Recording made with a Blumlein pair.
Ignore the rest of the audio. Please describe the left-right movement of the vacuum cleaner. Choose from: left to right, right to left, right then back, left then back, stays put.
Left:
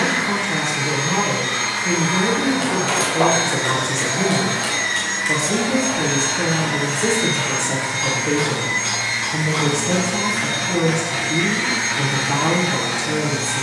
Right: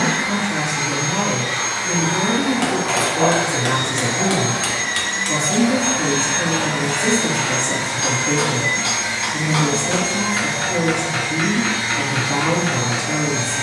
right then back.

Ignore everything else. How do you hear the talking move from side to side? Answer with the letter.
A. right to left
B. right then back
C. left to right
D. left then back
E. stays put
E.